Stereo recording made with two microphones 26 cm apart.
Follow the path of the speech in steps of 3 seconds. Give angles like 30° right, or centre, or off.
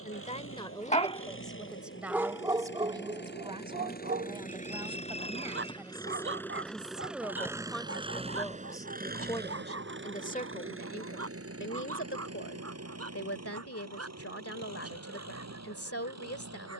10° left, 20° right, centre, 30° left, 60° left, 60° left.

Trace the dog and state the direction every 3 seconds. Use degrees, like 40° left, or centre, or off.
centre, 40° right, 60° right, 60° right, 70° right, 70° right.